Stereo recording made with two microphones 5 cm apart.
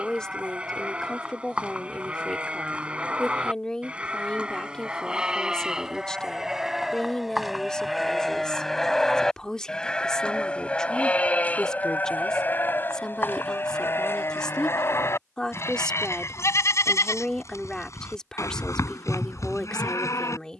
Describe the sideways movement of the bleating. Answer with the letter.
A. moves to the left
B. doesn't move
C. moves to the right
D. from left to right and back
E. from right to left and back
A.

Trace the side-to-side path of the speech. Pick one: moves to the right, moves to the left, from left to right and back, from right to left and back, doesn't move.
doesn't move.